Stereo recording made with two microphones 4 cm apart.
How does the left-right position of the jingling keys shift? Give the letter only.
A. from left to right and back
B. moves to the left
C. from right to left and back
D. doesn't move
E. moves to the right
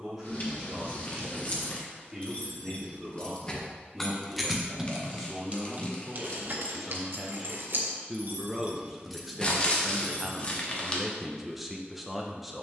A.